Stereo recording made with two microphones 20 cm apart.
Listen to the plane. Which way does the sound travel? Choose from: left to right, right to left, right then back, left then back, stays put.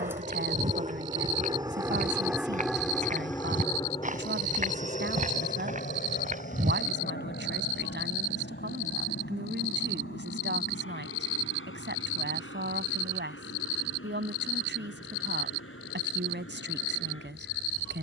right to left.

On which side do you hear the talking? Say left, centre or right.
right.